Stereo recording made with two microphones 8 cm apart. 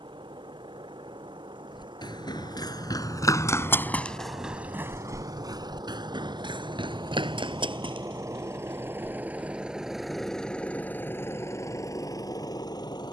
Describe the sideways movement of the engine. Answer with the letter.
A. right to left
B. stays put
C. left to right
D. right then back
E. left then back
A.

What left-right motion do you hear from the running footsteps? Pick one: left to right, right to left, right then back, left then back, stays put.
left to right.